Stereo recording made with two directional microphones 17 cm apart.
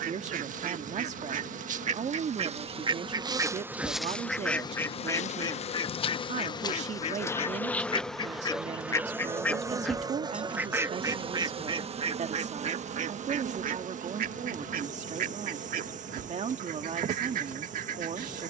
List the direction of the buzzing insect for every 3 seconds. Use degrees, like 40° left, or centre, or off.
50° right, 10° left, 10° left, 30° right, 50° right, 50° right.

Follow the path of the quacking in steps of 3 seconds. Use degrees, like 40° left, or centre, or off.
50° right, centre, 30° left, 10° right, 50° right, 60° right.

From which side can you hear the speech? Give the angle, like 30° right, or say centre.
40° right.